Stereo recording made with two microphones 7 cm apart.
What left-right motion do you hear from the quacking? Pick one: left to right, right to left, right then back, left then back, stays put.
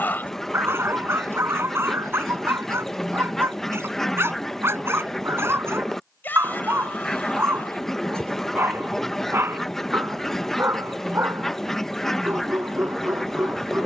stays put.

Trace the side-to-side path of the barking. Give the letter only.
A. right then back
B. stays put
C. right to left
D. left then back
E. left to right
B.